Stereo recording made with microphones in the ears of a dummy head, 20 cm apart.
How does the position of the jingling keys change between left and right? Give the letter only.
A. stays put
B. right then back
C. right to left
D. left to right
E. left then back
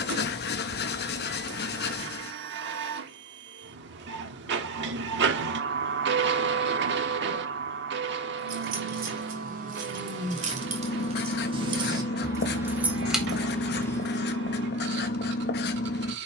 C.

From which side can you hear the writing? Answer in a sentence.
In this clip you hear the writing on the left.